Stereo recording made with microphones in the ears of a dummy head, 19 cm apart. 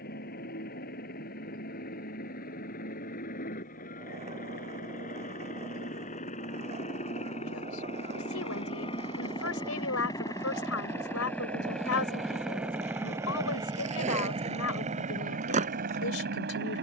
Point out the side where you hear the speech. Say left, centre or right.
left.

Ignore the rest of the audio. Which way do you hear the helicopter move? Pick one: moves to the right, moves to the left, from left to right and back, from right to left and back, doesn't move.
moves to the right.